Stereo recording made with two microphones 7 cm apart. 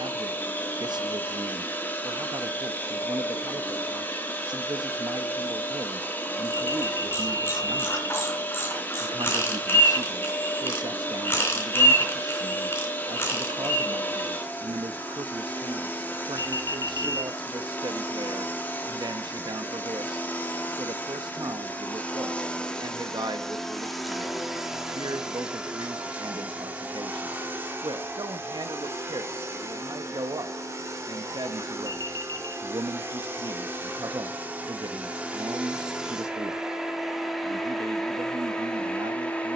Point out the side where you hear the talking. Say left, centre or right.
right.